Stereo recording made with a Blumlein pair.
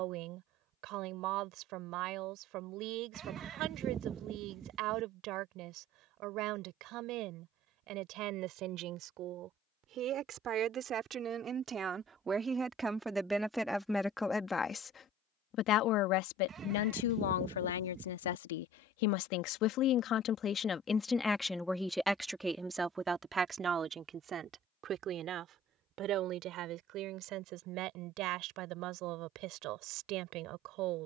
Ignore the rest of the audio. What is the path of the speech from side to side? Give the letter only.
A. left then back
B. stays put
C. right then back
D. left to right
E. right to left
A.